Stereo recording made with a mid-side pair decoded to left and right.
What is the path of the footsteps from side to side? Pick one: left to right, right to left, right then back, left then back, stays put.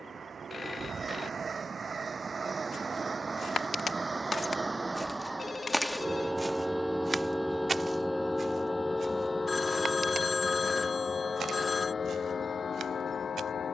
left to right.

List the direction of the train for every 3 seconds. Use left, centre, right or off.
right, right, centre, left, left.